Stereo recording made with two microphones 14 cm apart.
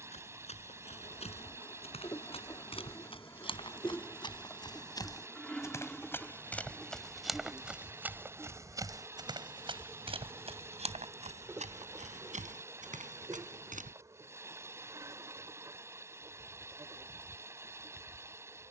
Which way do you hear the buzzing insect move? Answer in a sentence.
In this clip you hear the buzzing insect go from the left side to the right.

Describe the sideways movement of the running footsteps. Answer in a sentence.
In this clip you hear the running footsteps travel towards the right.